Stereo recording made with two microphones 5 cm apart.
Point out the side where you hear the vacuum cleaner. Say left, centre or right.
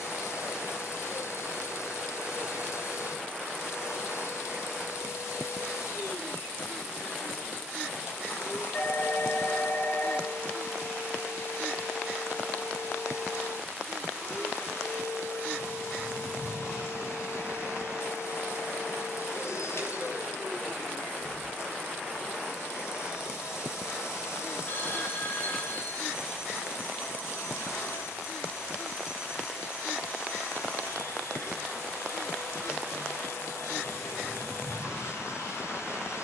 left.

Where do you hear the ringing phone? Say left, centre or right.
left.